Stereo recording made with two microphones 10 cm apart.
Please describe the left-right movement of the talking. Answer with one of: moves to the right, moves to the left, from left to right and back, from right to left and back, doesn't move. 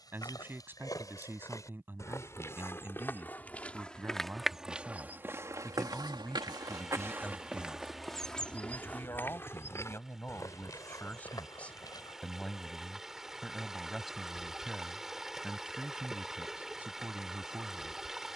from right to left and back.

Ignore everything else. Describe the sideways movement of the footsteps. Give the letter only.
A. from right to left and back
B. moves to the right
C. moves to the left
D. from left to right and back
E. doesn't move
D.